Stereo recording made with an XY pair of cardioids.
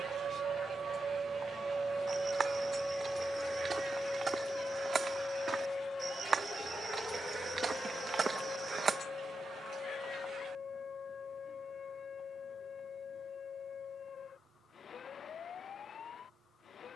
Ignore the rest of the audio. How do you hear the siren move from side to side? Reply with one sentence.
In this clip you hear the siren move to the left.